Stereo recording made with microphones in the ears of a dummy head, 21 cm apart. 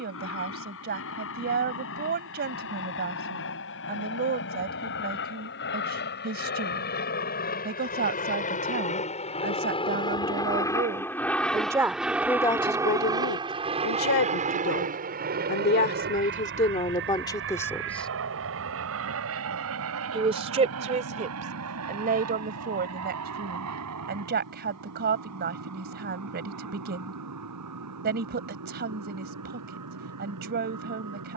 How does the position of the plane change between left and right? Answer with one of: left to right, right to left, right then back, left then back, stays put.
left to right.